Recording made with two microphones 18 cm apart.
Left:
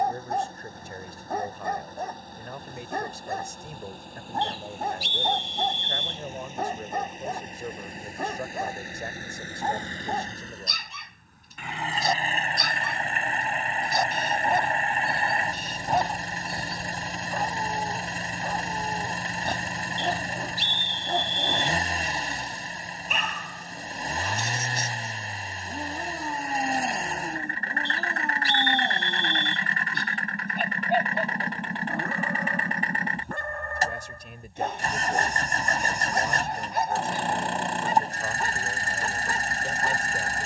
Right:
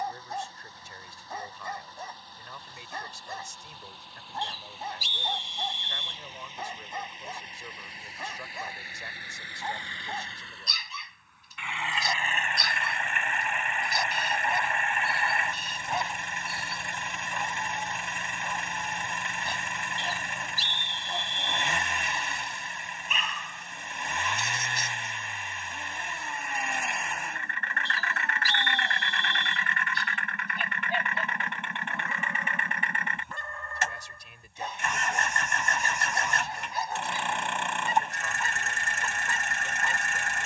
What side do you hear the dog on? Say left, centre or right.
left.